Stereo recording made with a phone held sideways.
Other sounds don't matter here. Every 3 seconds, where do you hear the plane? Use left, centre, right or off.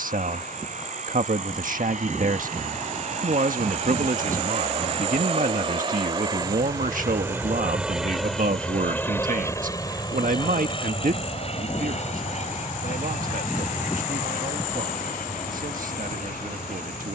right, right, centre, left, left, left.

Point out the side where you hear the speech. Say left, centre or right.
right.